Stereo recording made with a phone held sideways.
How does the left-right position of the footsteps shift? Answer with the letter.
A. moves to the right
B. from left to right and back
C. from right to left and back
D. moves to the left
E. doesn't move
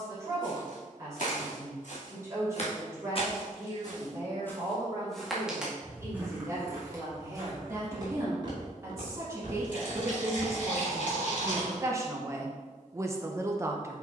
A.